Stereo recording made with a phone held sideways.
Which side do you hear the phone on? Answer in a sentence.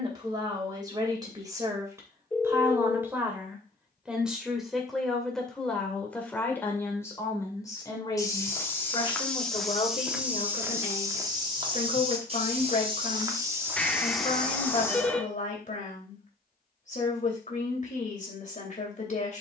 You can hear the phone in the centre.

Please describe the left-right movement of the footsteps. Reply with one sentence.
You can hear the footsteps move from left to right and back again.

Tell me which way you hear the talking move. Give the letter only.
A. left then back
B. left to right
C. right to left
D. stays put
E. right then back
C.